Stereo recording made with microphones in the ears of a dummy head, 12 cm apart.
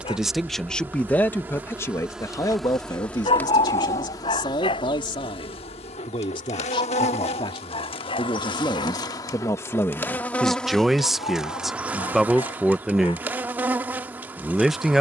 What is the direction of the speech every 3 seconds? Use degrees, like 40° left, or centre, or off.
10° left, 30° left, 30° left, 10° left, centre.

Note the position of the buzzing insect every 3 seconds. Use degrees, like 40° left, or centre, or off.
10° right, 30° left, 40° left, 10° left, 10° right.